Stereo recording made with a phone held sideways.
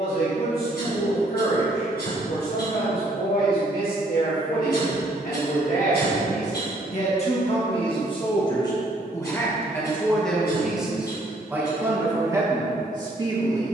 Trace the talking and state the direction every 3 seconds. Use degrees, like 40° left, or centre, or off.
70° left, 60° left, 40° left, centre, 20° right.